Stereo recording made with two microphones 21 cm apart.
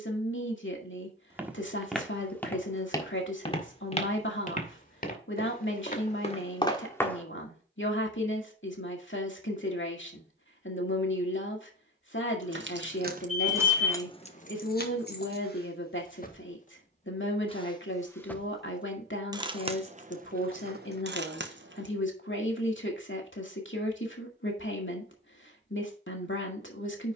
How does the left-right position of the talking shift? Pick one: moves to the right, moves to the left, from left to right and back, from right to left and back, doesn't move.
doesn't move.